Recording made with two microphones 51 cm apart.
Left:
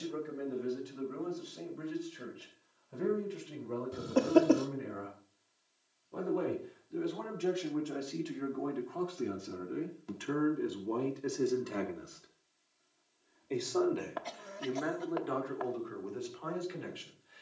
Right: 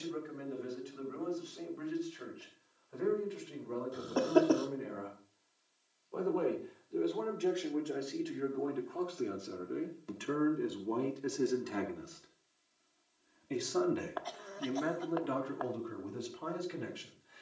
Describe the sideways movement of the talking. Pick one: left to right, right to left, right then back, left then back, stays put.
left to right.